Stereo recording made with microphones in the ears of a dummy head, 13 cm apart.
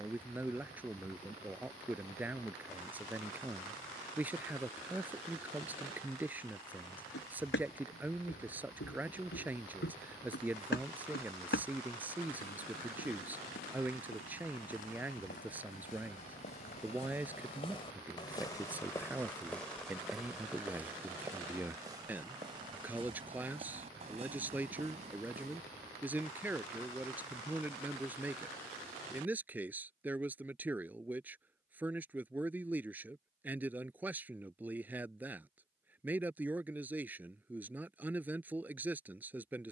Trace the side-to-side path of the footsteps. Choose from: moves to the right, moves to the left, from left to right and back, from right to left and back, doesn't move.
moves to the right.